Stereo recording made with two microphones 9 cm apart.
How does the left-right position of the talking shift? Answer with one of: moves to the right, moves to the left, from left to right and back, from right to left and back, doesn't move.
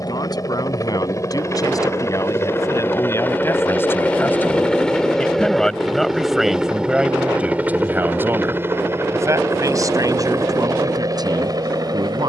moves to the right.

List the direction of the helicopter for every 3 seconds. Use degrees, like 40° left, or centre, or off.
30° left, 10° left, 20° right, 40° right.